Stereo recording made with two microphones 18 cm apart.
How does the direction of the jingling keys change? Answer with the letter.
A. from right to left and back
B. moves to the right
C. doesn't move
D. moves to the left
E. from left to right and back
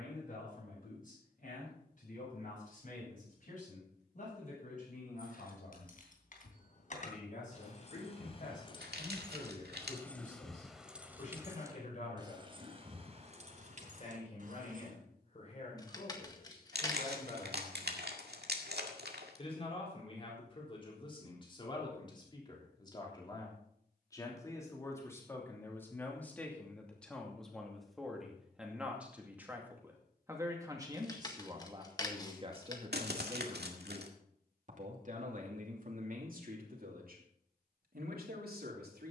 B.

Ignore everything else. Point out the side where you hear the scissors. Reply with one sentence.
In this clip you hear the scissors on the left.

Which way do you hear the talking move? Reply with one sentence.
In this clip you hear the talking move from left to right.